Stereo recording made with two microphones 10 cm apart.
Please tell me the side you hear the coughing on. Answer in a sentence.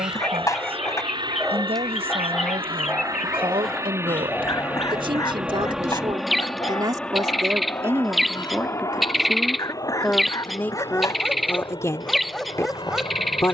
You can hear the coughing on the left.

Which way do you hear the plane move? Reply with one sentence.
In this clip you hear the plane go from the right side to the left.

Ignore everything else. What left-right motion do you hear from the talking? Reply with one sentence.
In this clip you hear the talking travel towards the left.